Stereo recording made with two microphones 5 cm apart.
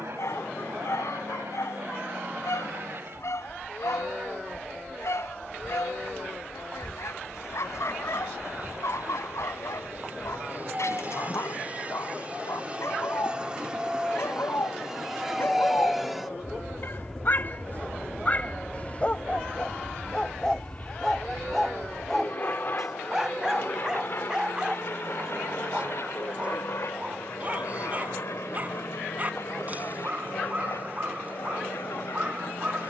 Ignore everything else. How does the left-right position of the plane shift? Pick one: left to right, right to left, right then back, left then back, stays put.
right to left.